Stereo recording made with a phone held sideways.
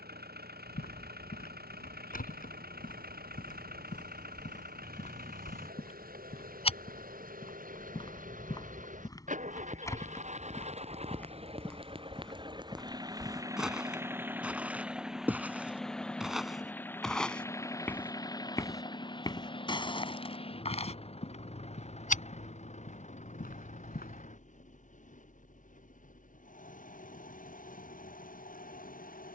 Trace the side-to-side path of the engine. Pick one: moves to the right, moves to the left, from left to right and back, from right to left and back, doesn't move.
moves to the left.